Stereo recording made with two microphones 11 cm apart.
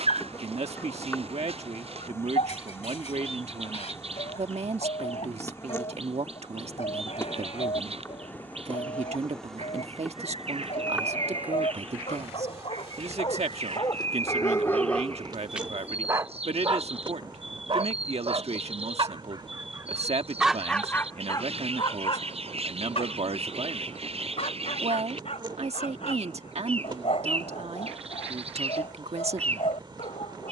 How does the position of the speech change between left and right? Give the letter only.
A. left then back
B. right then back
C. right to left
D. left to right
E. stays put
E.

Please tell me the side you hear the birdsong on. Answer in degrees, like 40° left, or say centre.
60° right.